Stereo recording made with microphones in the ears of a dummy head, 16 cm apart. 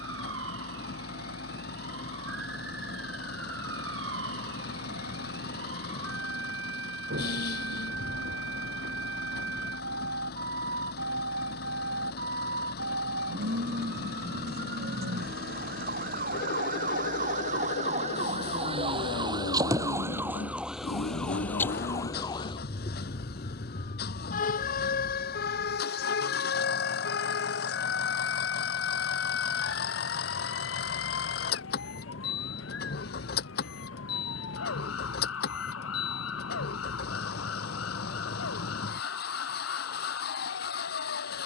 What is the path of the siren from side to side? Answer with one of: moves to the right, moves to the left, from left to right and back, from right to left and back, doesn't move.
moves to the left.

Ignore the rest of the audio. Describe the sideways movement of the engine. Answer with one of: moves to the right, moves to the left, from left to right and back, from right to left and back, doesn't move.
doesn't move.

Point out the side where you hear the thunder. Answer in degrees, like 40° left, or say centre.
70° right.